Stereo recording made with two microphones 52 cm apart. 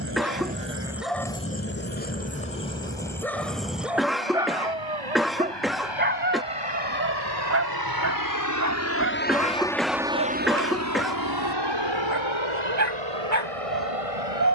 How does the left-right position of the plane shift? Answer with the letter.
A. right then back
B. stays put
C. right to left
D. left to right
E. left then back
D.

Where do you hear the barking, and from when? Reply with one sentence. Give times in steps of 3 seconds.
You can hear the barking in the centre from 0 s and on the right from 6 s.